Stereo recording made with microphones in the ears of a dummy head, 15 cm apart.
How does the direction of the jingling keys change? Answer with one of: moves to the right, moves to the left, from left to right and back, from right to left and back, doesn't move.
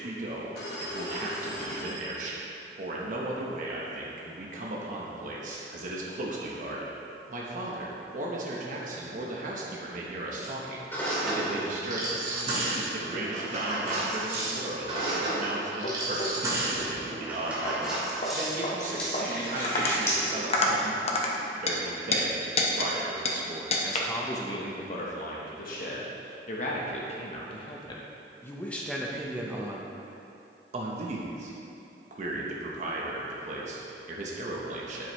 from left to right and back.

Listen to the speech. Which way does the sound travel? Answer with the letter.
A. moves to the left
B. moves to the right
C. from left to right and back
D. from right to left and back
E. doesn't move
D.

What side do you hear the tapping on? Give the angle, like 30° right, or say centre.
40° left.